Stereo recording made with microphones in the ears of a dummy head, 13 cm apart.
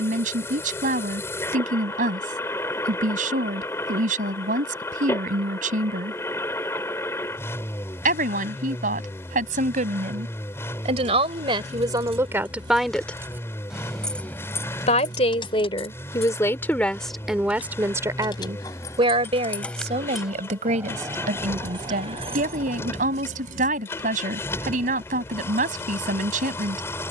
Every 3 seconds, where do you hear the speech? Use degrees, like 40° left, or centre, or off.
60° right, 60° right, 60° right, 50° right, centre, 10° left, 40° right, 60° right, 60° right.